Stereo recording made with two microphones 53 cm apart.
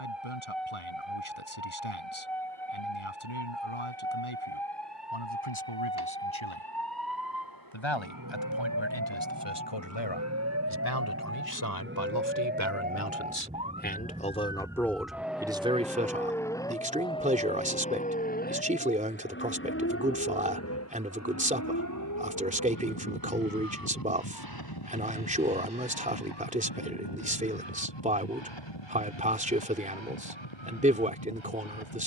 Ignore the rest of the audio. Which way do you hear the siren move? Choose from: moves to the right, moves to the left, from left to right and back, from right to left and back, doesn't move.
moves to the left.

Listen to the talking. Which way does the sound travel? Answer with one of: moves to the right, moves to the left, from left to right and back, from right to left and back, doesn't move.
moves to the right.